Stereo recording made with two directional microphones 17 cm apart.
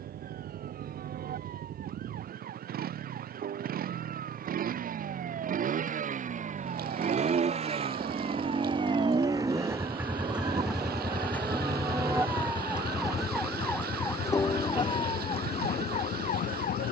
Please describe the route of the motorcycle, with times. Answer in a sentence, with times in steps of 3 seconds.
You can hear the motorcycle on the right from 0 s, in the centre from 9 s and on the left from 12 s.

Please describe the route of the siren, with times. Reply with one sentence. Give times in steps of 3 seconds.
In this clip you hear the siren on the right from 0 s, in the centre from 12 s and on the left from 15 s.